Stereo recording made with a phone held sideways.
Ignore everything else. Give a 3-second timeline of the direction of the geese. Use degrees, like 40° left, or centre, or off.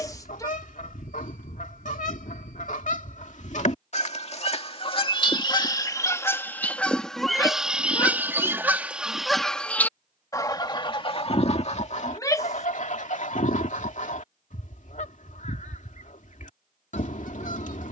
60° left, 40° left, centre, 30° left, 60° left, 60° left.